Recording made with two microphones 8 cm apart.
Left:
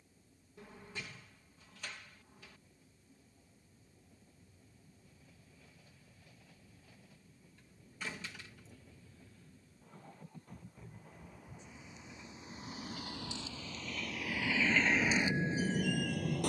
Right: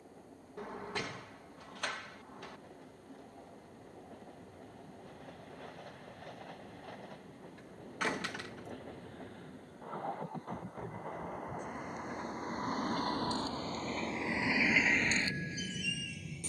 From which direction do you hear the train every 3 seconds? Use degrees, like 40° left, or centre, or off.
70° right, 70° right, 70° right, 60° right, 40° right, 40° left.